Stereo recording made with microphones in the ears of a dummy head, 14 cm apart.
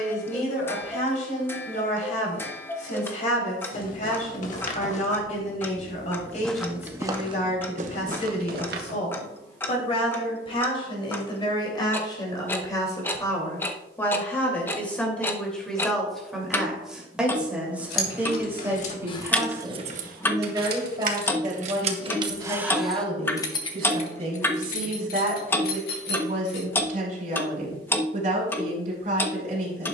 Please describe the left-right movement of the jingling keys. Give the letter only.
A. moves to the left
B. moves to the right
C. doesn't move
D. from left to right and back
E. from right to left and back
D.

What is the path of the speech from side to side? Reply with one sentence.
You can hear the speech move from left to right.